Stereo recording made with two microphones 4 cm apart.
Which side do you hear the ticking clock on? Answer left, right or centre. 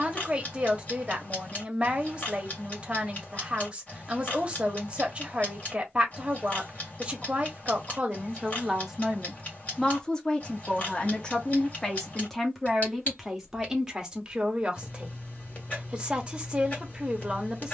left.